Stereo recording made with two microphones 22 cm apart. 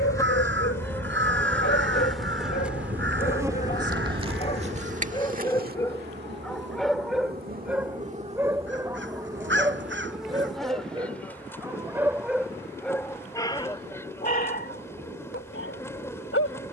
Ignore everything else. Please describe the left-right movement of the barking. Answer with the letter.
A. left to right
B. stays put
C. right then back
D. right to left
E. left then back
C.